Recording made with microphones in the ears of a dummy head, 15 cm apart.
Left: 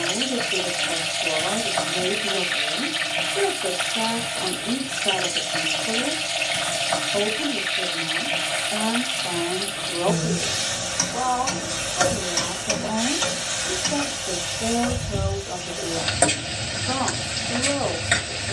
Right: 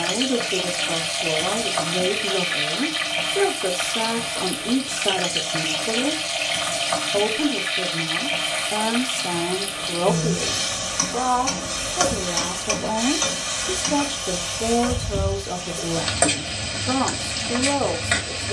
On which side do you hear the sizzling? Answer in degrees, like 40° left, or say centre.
10° left.